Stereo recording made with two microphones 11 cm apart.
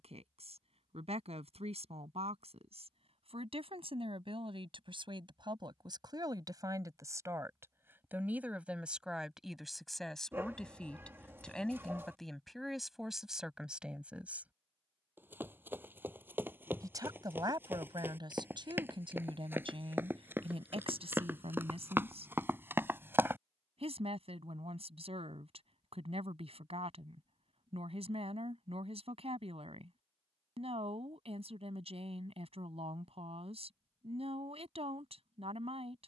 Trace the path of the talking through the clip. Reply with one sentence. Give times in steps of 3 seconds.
In this clip you hear the talking on the right from 0 s, in the centre from 9 s and on the right from 15 s.